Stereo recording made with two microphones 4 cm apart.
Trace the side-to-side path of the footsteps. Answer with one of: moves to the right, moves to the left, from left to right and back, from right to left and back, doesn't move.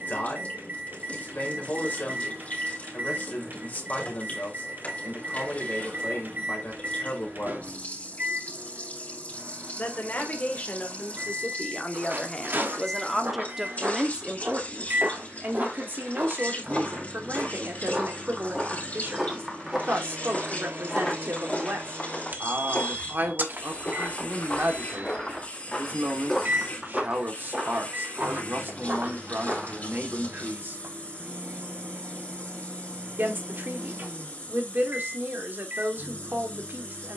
from right to left and back.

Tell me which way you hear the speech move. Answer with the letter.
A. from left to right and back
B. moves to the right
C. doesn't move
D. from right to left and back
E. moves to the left
B.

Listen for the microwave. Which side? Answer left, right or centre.
right.